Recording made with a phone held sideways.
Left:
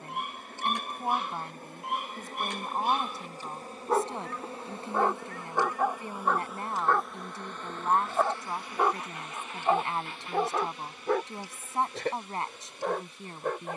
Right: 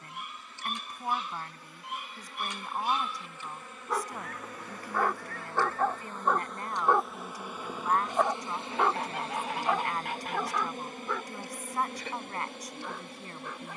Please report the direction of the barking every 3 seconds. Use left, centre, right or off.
left, left, centre, left, left.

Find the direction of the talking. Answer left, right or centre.
left.